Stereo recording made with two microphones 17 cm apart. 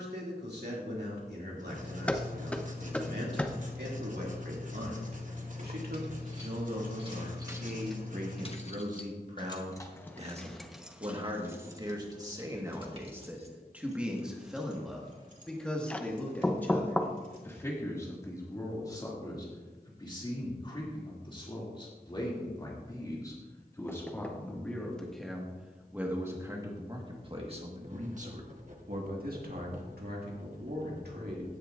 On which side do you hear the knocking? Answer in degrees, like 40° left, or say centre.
10° left.